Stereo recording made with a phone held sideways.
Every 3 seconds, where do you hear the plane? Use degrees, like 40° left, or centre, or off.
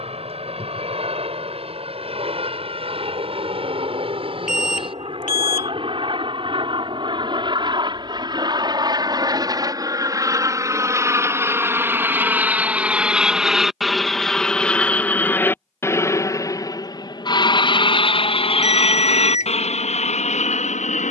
50° right, 40° right, 40° right, 20° right, centre, 20° left, 50° left.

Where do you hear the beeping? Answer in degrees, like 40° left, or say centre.
60° left.